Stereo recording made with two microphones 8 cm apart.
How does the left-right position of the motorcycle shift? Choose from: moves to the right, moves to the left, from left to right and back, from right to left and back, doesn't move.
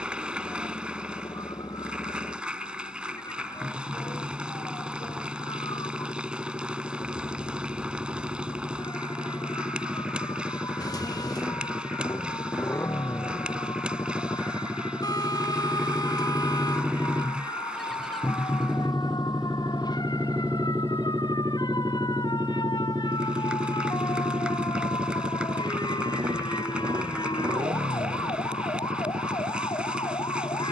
moves to the right.